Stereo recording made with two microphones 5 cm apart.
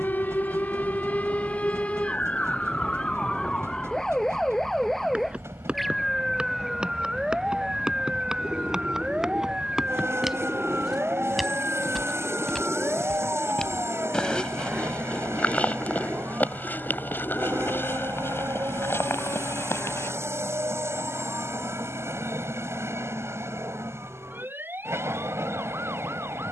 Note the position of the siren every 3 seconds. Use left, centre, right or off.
left, centre, centre, right, right, right, right, right, right.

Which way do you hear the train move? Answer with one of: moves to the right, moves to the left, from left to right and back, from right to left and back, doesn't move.
doesn't move.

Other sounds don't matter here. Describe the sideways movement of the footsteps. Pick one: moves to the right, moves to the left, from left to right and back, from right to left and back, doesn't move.
moves to the left.